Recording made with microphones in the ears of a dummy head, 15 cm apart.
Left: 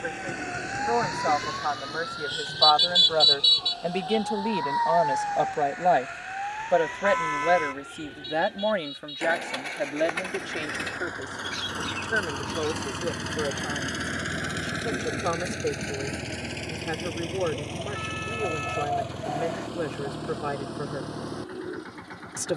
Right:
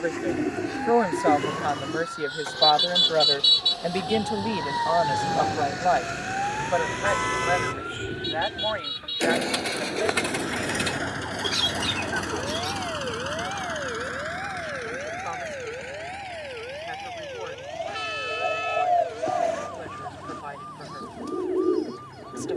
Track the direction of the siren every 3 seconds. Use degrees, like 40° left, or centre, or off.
50° left, 20° right, 60° right, 70° right, 80° right, 80° right, 80° right, 80° right.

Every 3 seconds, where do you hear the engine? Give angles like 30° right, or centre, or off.
70° right, 70° right, 60° right, 30° right, 20° left, 50° left, 70° left, 70° left.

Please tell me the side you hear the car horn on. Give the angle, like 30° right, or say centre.
40° right.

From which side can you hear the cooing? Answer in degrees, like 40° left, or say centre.
60° right.